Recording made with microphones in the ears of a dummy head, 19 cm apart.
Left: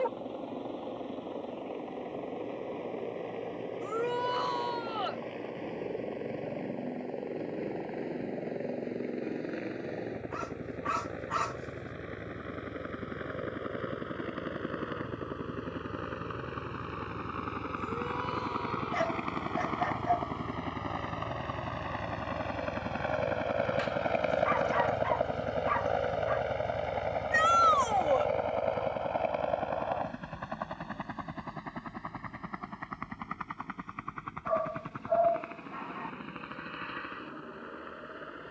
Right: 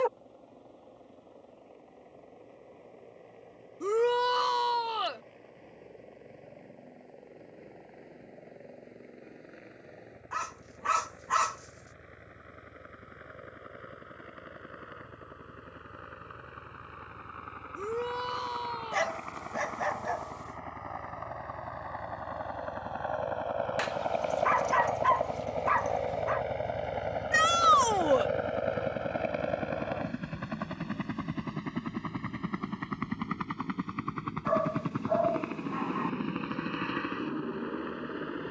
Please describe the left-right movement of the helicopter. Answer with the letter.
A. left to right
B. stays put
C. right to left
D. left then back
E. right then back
A.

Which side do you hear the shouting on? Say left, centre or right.
right.